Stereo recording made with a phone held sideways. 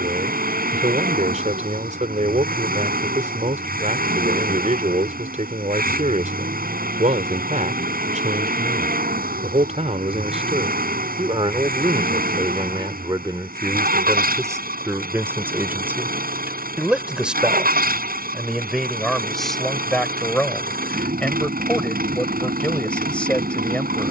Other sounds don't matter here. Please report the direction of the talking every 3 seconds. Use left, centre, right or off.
right, right, right, right, right, centre, centre, centre.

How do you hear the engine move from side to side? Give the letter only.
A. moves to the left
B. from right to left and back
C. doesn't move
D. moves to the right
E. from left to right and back
C.